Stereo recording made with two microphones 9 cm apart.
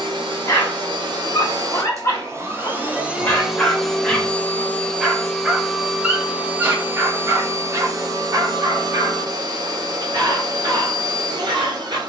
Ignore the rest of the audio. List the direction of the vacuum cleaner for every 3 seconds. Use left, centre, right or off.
right, centre, right, right.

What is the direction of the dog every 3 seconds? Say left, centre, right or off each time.
left, centre, right, right.